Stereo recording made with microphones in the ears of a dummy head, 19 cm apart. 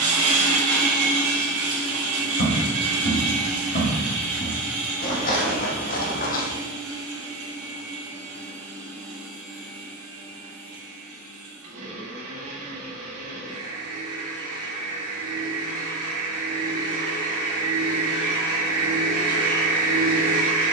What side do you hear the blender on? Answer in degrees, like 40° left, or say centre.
70° right.